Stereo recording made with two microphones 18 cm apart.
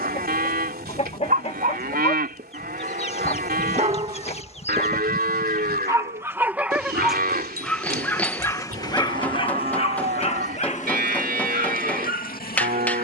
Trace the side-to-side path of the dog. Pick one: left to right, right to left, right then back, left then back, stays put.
right to left.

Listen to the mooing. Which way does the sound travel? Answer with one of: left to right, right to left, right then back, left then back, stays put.
stays put.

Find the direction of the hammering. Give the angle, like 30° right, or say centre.
10° left.